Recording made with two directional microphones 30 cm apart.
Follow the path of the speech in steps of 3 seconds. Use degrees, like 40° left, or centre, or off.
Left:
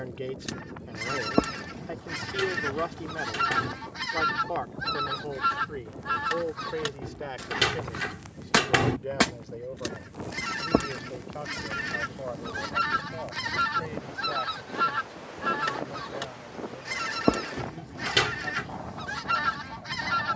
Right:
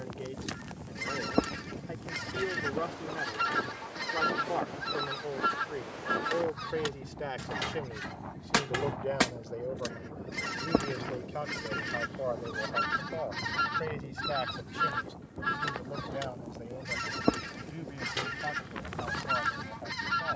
30° left, 10° left, centre, 20° right, 30° right, 30° right, 40° right.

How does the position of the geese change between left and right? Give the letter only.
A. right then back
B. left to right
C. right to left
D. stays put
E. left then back
D.